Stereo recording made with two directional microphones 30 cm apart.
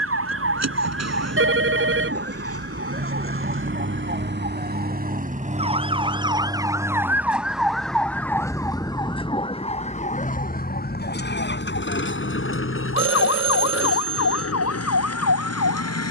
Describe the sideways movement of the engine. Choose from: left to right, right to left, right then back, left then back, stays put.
right to left.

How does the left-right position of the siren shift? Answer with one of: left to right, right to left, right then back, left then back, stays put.
right to left.